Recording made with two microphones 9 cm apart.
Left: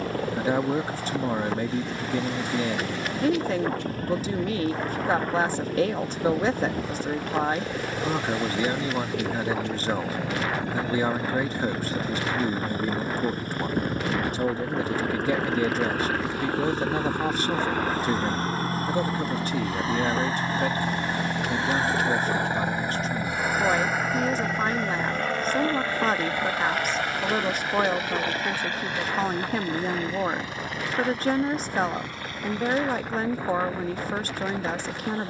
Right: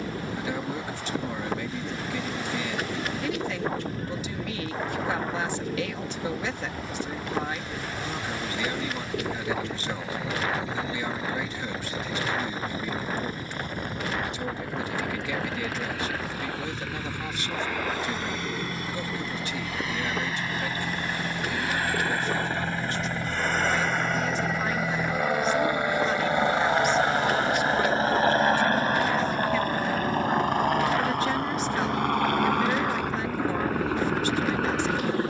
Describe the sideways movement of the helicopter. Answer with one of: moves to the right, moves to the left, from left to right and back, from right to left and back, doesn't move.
moves to the right.